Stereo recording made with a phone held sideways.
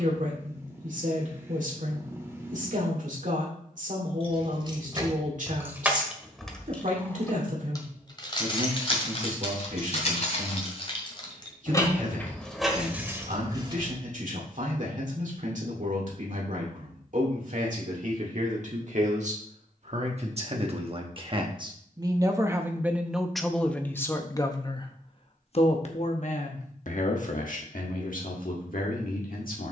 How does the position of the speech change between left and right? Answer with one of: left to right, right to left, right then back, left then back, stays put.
right to left.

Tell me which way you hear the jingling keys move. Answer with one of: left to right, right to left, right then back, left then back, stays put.
left then back.